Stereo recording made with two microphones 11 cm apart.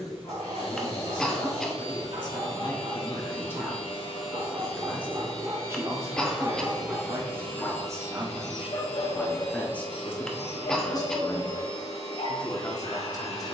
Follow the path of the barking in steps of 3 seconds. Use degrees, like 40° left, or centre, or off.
60° right, 40° right, 10° left, 60° left, 80° left.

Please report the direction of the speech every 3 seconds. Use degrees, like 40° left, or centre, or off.
40° left, centre, 30° right, 20° left, 30° left.